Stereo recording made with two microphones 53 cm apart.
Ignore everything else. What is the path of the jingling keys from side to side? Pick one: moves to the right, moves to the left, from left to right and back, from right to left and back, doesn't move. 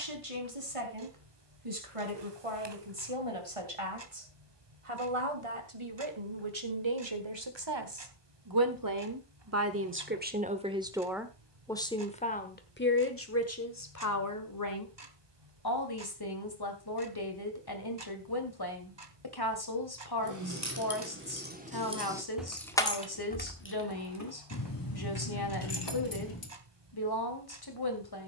moves to the left.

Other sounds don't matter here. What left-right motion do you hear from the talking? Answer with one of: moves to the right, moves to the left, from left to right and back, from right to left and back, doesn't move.
moves to the left.